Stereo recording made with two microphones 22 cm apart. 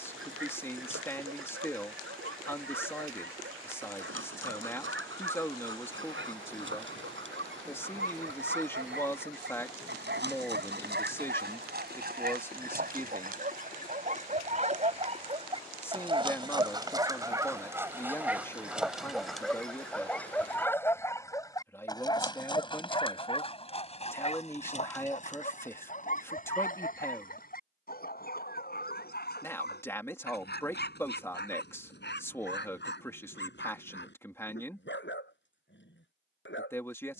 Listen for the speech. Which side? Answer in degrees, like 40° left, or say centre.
10° left.